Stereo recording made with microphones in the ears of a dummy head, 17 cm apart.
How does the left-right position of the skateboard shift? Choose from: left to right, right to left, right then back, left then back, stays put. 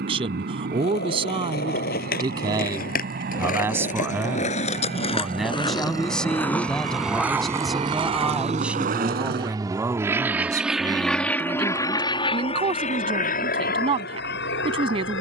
left to right.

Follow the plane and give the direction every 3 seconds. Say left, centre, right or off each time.
right, right, right, centre, left.